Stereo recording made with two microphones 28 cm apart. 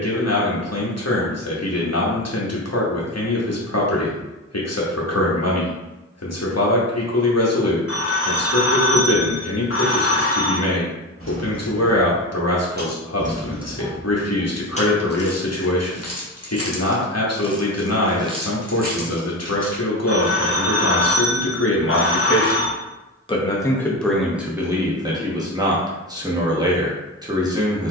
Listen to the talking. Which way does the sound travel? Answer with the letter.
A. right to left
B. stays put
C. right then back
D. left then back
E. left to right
E.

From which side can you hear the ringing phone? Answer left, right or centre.
left.